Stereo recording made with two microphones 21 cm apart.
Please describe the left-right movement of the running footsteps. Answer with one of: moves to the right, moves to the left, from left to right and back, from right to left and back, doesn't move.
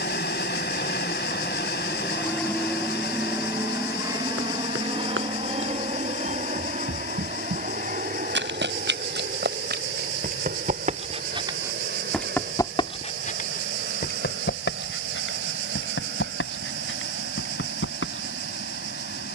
moves to the left.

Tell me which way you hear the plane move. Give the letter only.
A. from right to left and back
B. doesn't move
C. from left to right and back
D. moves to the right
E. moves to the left
D.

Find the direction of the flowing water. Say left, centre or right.
left.